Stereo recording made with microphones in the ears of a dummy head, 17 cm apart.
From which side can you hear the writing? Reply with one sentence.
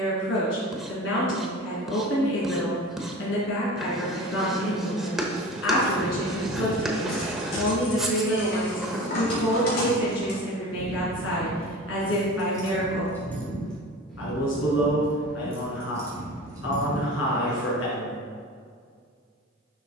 In this clip you hear the writing in the centre.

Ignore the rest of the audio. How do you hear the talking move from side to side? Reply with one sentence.
In this clip you hear the talking stay in one place.